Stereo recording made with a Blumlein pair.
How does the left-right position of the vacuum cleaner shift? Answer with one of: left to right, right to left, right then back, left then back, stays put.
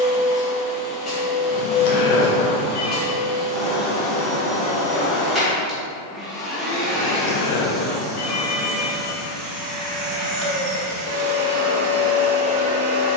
left to right.